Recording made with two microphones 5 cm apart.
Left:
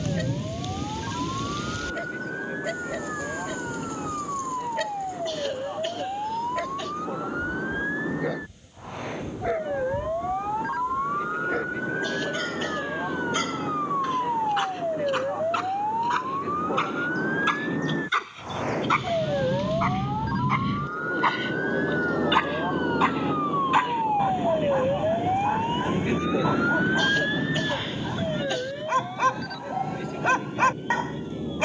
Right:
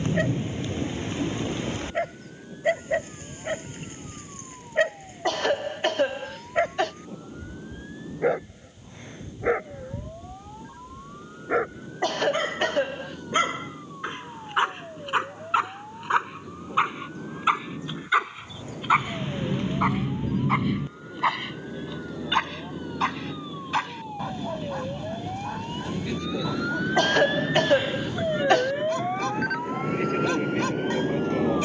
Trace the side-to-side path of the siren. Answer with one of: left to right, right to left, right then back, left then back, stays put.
left to right.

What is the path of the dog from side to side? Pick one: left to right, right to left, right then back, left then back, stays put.
right to left.